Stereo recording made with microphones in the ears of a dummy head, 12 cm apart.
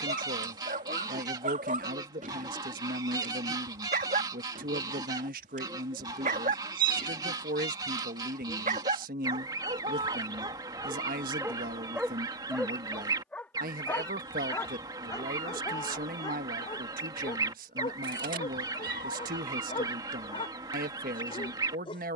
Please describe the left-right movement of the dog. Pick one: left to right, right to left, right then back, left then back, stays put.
right to left.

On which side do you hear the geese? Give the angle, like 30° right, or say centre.
30° right.